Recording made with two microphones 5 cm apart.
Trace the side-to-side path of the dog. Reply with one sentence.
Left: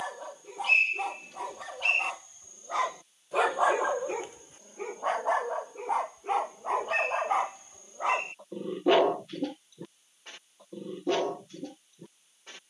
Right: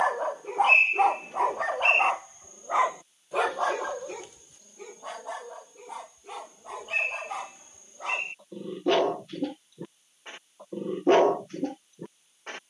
You can hear the dog move from right to left and back again.